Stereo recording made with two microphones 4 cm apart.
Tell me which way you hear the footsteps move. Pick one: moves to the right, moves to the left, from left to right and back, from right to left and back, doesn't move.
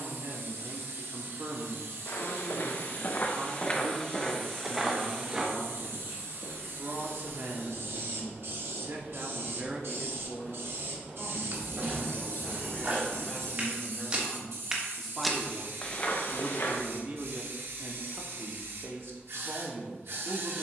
from left to right and back.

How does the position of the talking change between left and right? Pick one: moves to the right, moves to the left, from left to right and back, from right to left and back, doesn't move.
from right to left and back.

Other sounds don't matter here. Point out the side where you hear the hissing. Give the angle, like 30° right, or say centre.
70° right.